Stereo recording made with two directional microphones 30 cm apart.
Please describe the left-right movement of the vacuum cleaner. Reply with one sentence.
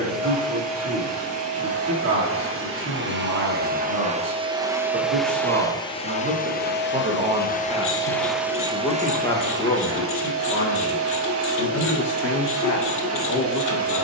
In this clip you hear the vacuum cleaner go left and come back.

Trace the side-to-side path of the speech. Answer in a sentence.
You can hear the speech travel towards the left.